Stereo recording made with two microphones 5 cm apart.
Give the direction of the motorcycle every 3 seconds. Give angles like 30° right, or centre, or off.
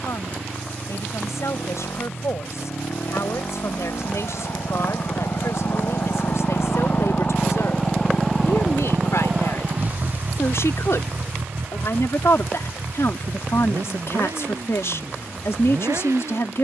80° left, 70° left, 20° left, 40° right, 60° right, 70° right.